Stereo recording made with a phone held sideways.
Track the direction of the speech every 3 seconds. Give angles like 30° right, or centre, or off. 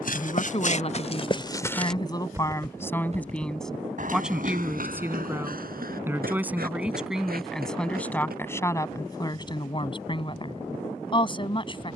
30° left, centre, centre, 30° left.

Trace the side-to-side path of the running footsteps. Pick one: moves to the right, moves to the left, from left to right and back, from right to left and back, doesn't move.
moves to the right.